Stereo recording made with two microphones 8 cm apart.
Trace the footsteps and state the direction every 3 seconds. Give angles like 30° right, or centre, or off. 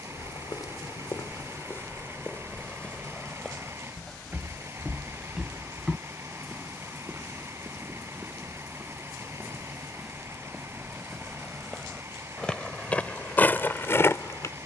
40° left, centre, 10° right, centre, 20° left.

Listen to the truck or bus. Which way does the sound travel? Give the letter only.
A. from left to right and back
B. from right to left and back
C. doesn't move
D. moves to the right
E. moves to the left
C.